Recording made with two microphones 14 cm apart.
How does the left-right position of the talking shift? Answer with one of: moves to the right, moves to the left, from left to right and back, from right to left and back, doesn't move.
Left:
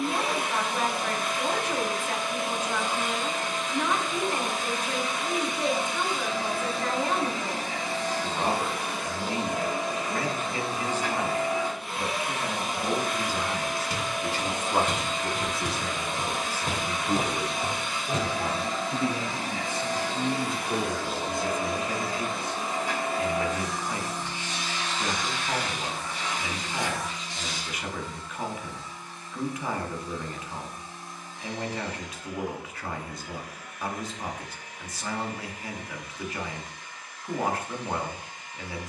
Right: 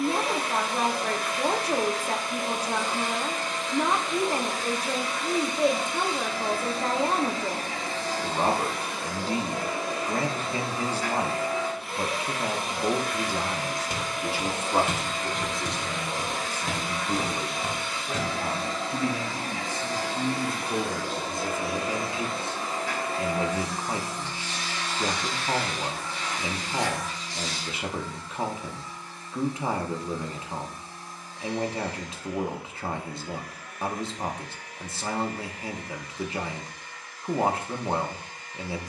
from right to left and back.